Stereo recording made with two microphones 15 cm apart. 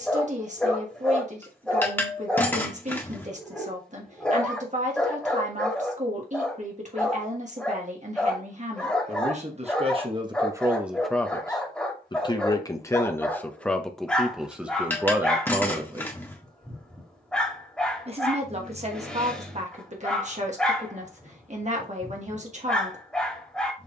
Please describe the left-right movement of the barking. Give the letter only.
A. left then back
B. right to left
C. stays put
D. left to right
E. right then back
C.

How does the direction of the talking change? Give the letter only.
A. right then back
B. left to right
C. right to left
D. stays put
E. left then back
E.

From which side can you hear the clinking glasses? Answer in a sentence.
You can hear the clinking glasses in the centre.